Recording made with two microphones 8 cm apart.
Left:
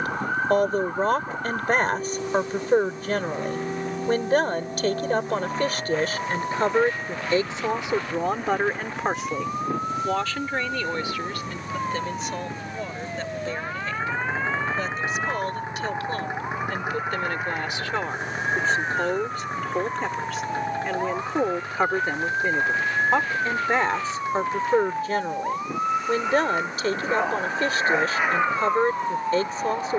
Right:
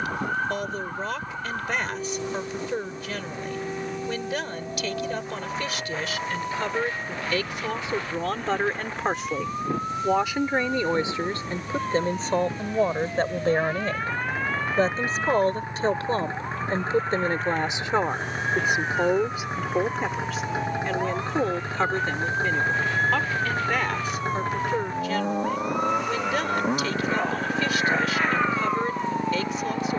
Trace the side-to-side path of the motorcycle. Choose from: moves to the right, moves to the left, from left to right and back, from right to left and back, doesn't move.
moves to the right.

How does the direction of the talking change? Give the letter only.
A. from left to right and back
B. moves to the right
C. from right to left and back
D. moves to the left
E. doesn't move
A.